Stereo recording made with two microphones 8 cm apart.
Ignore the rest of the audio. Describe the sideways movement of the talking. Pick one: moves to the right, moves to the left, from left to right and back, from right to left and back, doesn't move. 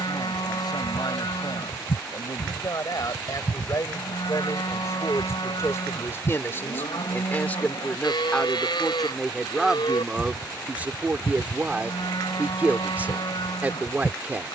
moves to the right.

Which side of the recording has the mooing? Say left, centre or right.
left.